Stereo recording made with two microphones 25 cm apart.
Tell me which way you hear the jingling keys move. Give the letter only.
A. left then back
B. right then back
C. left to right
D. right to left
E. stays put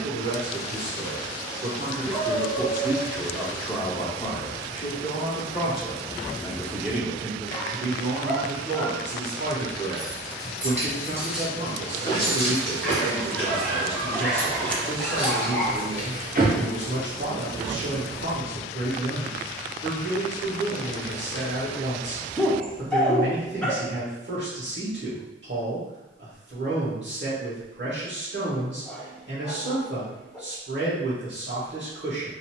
A.